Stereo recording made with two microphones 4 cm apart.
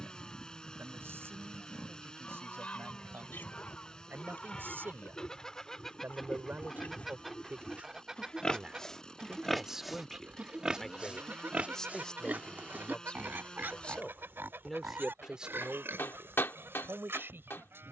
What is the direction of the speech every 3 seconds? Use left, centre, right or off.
right, right, right, centre, left, right.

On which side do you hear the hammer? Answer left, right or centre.
left.